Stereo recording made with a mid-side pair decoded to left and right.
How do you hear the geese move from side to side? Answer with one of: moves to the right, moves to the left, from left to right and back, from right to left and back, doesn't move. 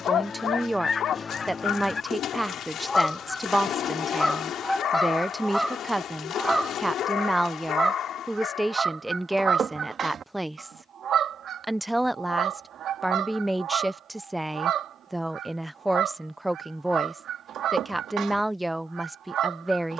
moves to the right.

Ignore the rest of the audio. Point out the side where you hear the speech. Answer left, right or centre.
centre.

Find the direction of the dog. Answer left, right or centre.
left.